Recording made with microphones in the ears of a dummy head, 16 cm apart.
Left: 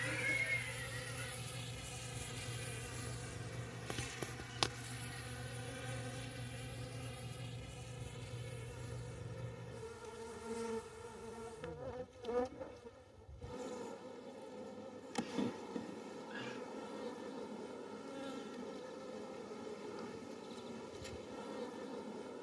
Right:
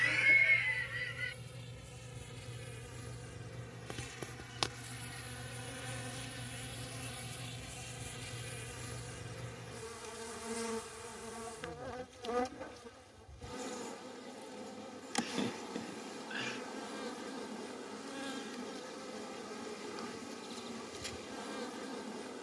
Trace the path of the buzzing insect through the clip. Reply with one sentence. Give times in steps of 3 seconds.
In this clip you hear the buzzing insect on the left from 0 s, in the centre from 3 s and on the right from 6 s.